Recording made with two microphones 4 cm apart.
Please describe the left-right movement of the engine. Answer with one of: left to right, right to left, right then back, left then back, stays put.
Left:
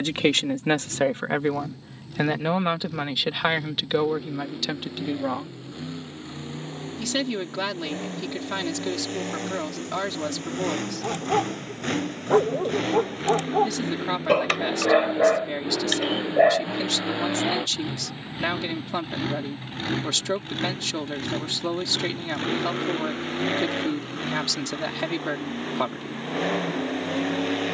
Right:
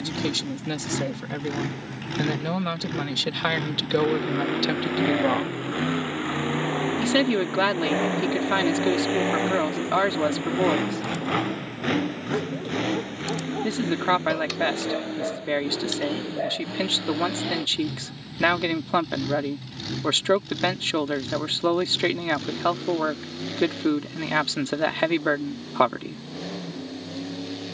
right to left.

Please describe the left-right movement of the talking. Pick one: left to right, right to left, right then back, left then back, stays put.
left to right.